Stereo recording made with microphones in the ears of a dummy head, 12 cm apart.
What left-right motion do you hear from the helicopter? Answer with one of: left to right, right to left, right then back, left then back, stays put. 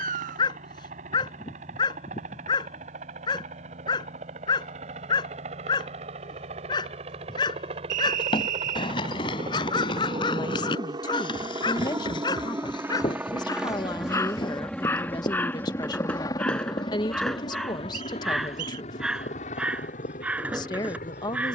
right to left.